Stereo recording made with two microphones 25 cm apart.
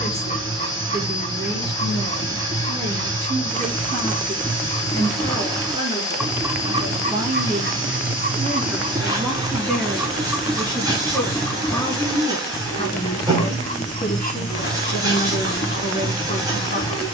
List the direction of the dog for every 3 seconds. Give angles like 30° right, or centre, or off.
30° left, 20° left, 30° right, centre, 20° left, 20° left.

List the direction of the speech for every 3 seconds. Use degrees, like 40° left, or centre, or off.
40° right, 30° right, 10° right, 10° left, 30° left, 40° left.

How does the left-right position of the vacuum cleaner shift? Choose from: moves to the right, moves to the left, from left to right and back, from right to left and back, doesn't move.
doesn't move.